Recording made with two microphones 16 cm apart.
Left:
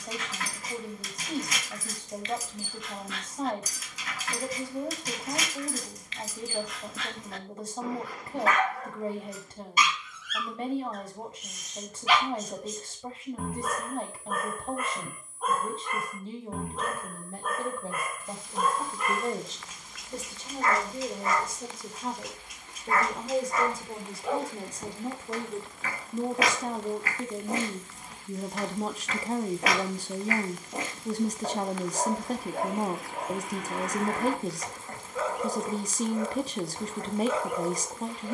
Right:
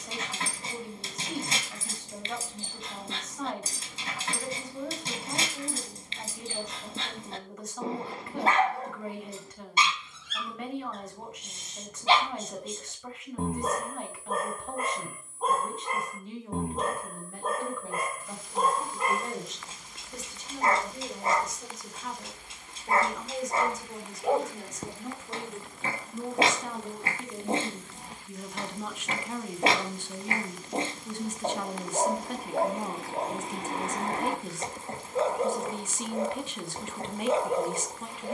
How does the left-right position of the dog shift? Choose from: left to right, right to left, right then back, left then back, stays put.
stays put.